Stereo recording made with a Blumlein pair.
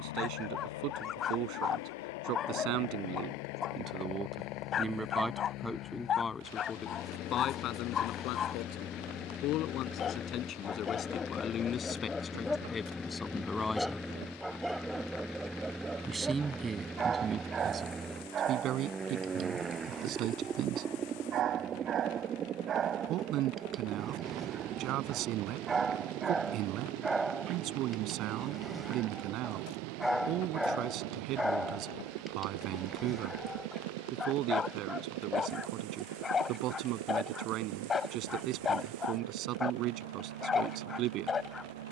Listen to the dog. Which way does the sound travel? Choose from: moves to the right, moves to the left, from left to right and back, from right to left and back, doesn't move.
from left to right and back.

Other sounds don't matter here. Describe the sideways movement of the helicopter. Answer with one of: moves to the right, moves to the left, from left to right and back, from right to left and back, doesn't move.
moves to the right.